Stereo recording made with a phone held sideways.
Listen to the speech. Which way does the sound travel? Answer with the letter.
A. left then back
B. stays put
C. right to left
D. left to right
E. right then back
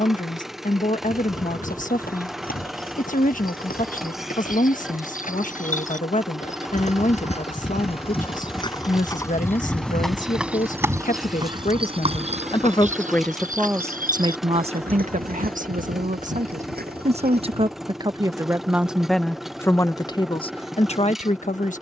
E.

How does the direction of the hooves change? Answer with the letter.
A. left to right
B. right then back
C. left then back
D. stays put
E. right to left
A.